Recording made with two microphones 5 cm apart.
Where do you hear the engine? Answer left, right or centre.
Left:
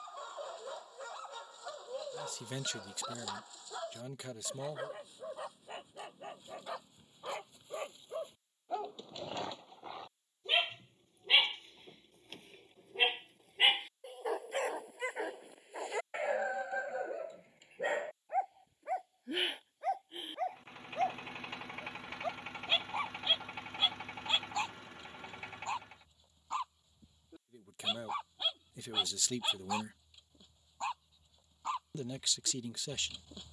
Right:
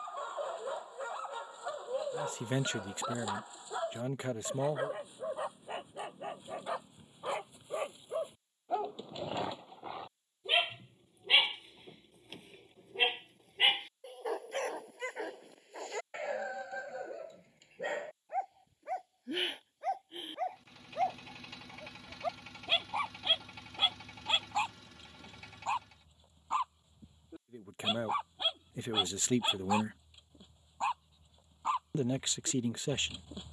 left.